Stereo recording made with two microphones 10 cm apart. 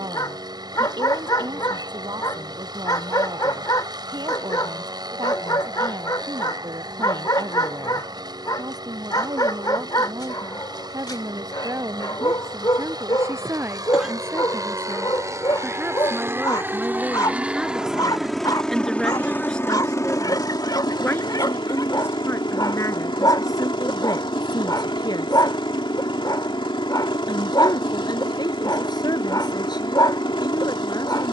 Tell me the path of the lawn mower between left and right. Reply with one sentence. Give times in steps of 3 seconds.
You can hear the lawn mower on the right from 0 s and on the left from 18 s.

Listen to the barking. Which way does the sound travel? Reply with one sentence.
You can hear the barking stay in one place.